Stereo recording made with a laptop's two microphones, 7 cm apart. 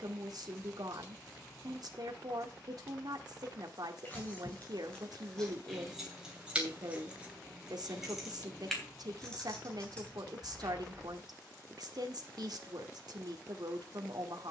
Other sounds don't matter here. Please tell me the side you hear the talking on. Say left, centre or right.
right.